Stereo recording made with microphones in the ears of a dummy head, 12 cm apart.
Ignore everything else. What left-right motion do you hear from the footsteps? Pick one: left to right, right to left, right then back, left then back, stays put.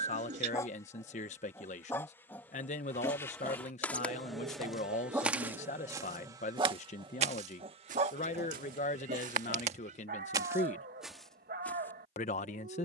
right then back.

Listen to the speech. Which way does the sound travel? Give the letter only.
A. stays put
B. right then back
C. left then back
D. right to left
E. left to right
A.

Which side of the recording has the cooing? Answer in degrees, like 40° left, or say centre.
60° right.